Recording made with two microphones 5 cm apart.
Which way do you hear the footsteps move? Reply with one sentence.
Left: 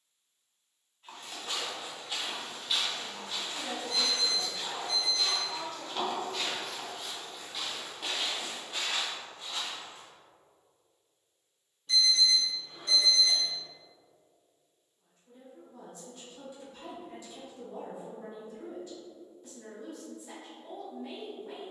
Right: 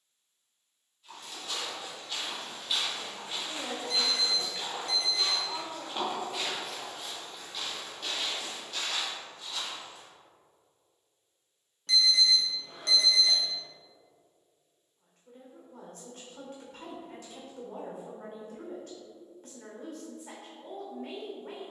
You can hear the footsteps move from left to right and back again.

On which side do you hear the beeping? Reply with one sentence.
You can hear the beeping on the right.